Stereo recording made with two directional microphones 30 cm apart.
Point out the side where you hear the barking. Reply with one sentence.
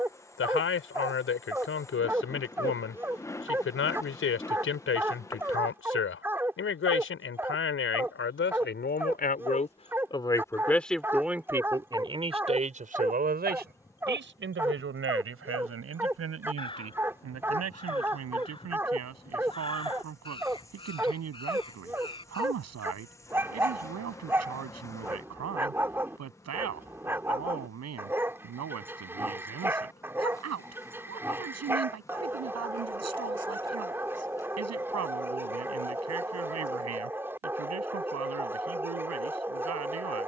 You can hear the barking in the centre.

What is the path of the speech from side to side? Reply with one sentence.
In this clip you hear the speech move to the right.